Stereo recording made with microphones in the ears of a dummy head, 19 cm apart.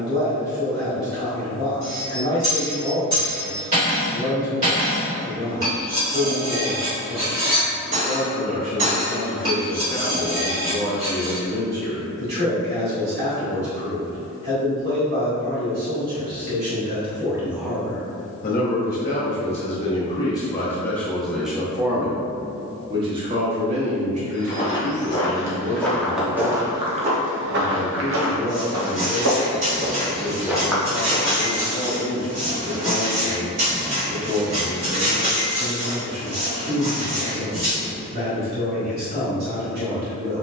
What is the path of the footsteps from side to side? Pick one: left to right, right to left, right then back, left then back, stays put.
right then back.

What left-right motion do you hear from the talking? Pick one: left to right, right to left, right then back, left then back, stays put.
left then back.